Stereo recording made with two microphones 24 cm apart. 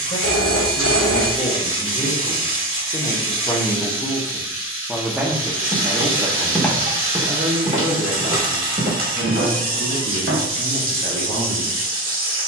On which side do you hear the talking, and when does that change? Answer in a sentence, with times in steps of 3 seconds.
You can hear the talking on the left from 0 s, in the centre from 3 s and on the right from 6 s.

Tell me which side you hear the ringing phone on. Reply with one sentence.
You can hear the ringing phone on the left.